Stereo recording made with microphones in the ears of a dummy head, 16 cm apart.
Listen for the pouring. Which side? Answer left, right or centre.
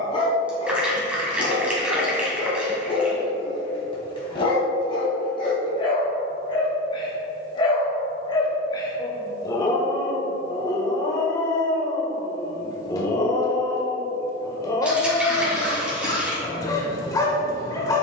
centre.